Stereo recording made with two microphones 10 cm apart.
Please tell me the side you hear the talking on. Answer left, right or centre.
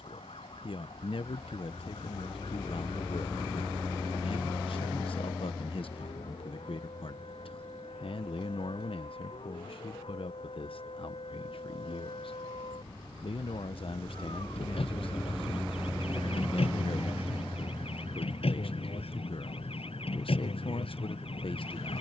left.